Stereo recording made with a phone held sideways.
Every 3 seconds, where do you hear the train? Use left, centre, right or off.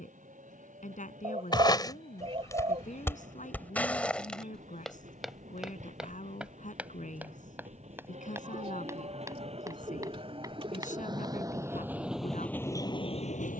right, right, right, right, left.